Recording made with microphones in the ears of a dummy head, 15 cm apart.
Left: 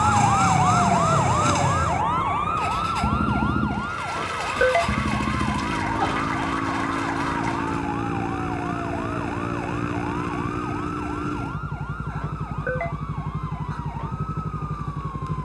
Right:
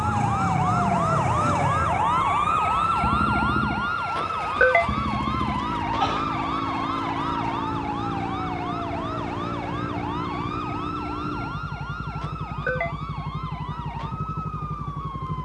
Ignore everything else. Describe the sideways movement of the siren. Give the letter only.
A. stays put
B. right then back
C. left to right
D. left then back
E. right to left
C.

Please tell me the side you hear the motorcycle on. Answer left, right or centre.
left.